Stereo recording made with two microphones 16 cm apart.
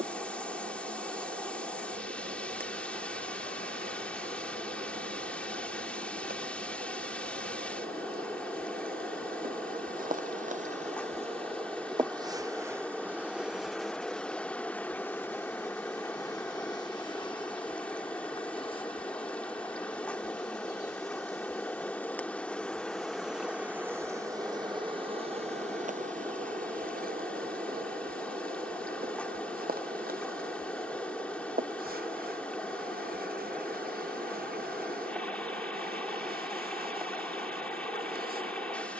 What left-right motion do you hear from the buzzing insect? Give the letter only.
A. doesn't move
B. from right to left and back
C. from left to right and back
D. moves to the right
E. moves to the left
B.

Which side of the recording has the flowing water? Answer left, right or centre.
centre.